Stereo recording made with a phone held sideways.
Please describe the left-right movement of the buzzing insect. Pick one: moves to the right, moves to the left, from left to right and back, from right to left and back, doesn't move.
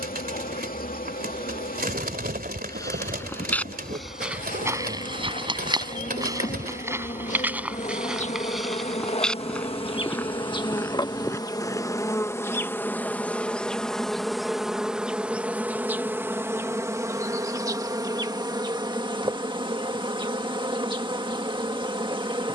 moves to the right.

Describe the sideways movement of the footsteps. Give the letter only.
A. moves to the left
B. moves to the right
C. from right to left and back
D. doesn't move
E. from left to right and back
E.